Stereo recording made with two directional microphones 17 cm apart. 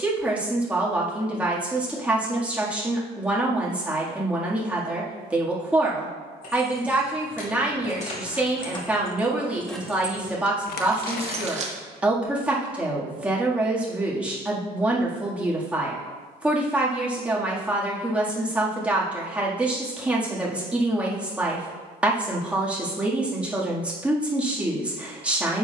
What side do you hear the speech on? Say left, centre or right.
centre.